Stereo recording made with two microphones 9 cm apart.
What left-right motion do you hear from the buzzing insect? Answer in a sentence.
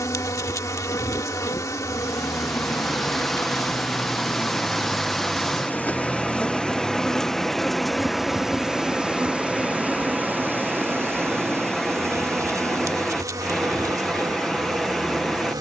You can hear the buzzing insect move to the right.